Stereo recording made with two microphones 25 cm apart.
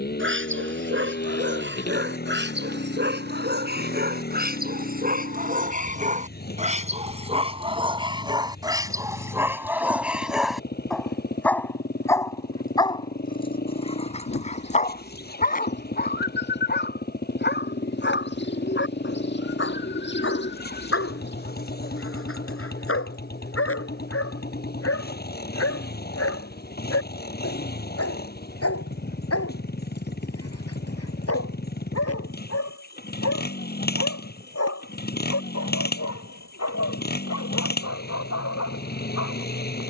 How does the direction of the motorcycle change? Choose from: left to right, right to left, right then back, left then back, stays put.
stays put.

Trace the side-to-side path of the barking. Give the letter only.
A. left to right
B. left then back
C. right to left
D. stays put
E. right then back
C.